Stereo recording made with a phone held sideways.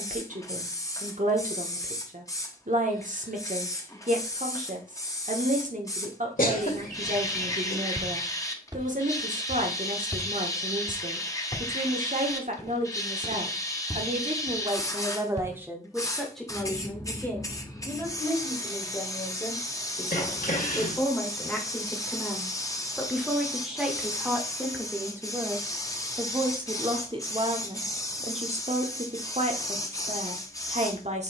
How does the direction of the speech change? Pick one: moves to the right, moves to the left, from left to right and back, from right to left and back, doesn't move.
from right to left and back.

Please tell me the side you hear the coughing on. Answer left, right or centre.
left.